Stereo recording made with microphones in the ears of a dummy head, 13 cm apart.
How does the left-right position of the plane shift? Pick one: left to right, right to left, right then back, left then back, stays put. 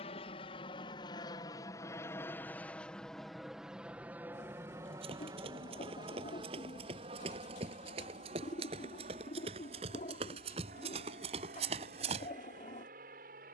left to right.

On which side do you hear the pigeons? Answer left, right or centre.
left.